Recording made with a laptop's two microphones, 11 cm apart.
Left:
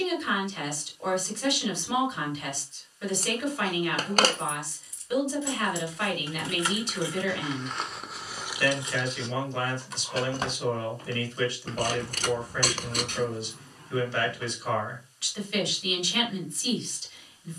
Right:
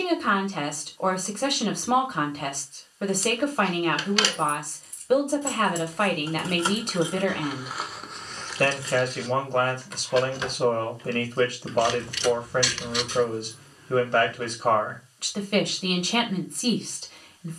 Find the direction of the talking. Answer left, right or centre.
right.